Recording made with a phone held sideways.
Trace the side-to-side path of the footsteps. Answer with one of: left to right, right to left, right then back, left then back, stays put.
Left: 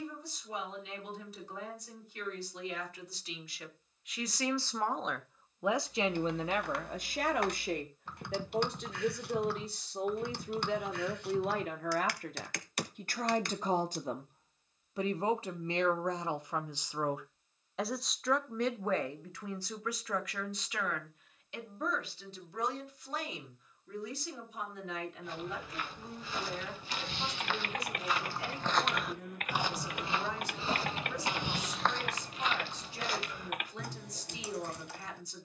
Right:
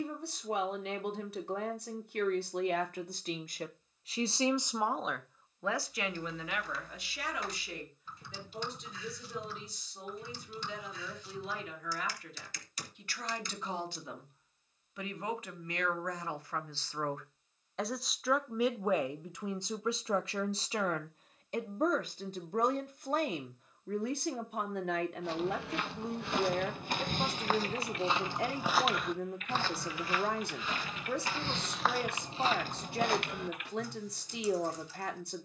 left then back.